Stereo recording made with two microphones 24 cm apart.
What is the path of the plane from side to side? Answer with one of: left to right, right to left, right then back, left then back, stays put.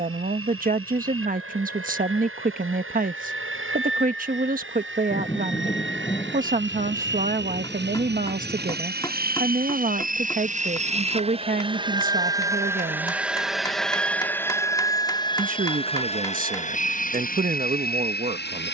right to left.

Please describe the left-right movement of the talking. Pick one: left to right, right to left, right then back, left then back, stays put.
stays put.